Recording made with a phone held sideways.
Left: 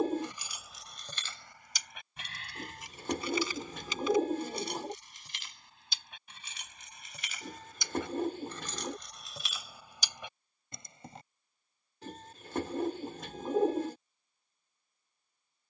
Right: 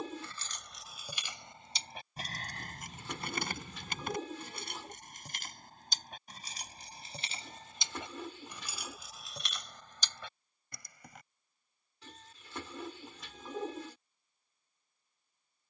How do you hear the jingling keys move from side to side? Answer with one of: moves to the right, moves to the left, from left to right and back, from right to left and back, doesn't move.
from left to right and back.